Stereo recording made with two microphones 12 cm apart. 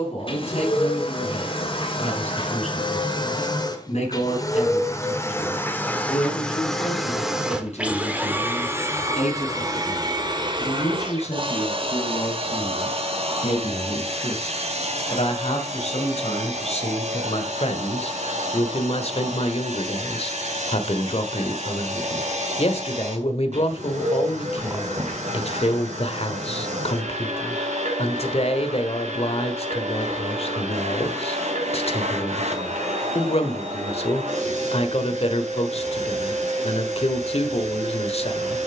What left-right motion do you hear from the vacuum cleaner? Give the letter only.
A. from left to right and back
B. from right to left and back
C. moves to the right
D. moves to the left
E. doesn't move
C.